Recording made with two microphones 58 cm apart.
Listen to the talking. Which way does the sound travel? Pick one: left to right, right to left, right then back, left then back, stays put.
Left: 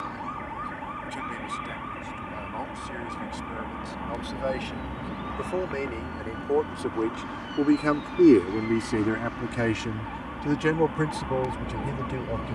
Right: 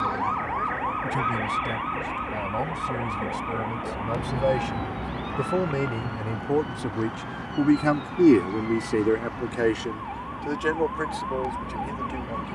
right to left.